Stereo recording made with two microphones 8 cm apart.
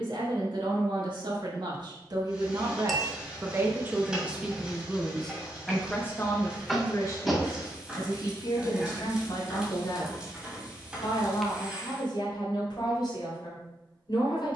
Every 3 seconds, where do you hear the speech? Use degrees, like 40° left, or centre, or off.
60° right, 10° right, 40° left, 60° left, 60° left.